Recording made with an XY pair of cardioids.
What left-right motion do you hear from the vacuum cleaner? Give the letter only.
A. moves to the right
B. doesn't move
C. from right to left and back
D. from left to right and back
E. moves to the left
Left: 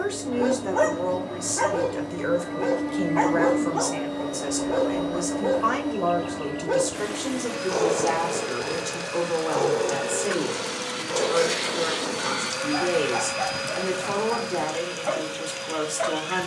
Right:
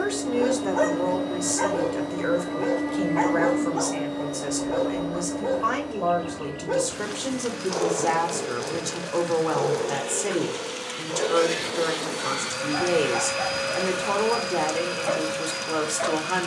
C.